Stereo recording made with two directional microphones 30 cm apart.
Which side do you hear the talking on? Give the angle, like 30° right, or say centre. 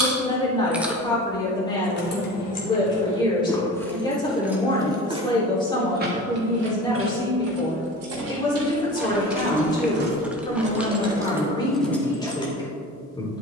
10° left.